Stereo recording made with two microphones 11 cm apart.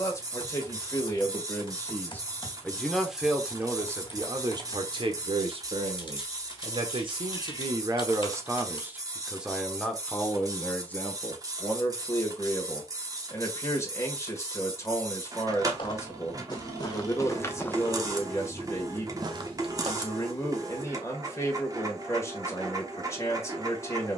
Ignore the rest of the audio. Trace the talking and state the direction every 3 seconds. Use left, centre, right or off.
left, right, right, centre, left, left, left, left.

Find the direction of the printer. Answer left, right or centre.
right.